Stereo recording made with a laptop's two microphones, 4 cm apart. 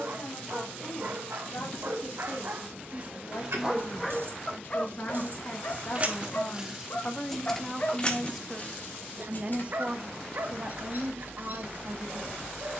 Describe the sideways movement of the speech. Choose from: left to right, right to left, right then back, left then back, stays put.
left to right.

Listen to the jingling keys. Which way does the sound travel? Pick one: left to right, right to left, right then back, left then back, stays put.
right to left.